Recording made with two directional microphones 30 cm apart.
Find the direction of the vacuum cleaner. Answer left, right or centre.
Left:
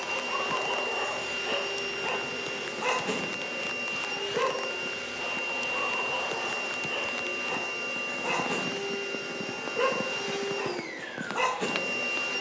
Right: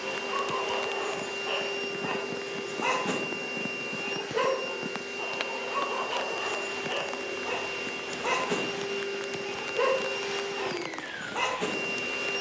centre.